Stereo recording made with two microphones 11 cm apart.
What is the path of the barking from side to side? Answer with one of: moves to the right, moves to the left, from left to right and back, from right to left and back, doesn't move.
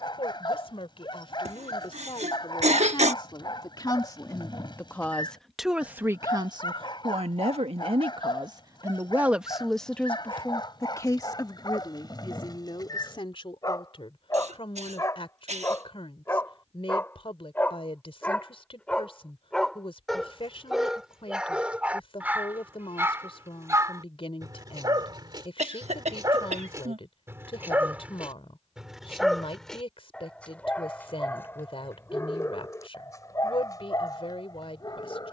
from left to right and back.